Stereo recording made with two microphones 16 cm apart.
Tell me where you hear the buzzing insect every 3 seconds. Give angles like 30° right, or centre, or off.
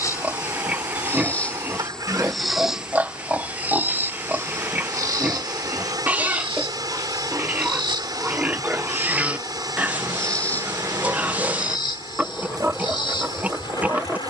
10° left, 20° right, 30° right, 10° left, 30° left.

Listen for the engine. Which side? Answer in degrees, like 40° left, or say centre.
20° right.